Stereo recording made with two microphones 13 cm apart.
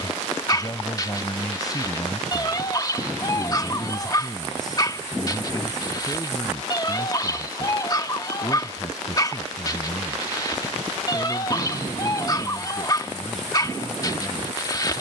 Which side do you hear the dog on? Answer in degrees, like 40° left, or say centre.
30° left.